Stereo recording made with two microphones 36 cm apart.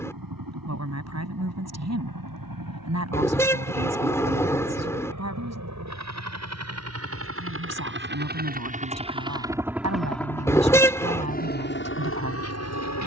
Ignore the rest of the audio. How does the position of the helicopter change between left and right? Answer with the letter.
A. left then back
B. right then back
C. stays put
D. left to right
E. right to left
E.